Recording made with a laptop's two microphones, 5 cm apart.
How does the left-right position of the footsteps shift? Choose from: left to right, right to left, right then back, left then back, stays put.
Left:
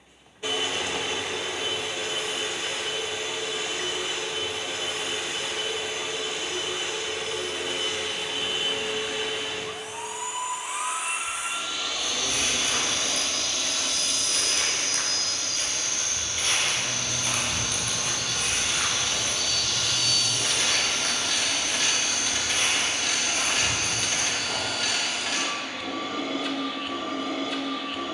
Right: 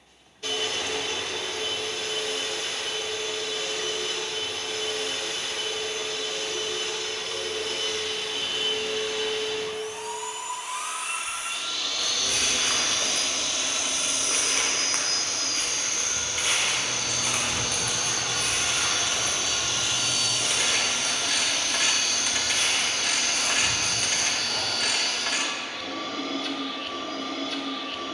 right to left.